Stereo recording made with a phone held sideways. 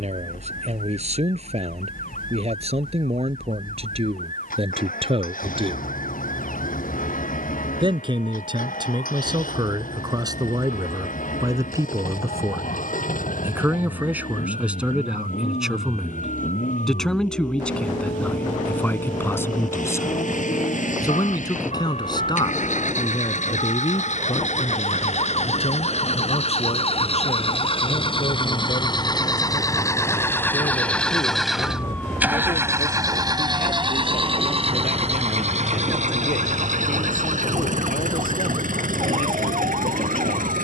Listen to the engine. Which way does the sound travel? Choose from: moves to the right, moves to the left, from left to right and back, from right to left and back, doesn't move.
moves to the right.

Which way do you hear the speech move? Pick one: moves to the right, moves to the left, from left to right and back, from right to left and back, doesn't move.
moves to the left.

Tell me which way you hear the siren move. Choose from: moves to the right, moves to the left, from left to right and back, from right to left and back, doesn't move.
moves to the right.